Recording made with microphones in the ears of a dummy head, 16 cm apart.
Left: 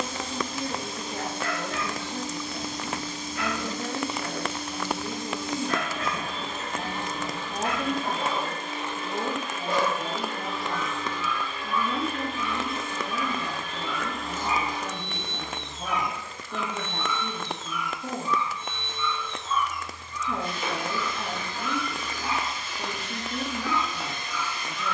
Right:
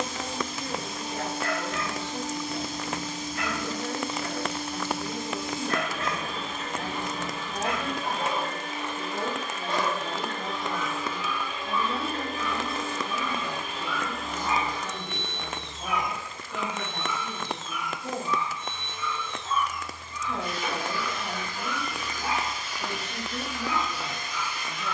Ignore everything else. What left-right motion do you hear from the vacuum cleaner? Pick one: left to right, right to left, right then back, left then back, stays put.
right then back.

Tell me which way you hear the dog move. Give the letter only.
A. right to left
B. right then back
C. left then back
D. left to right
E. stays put
D.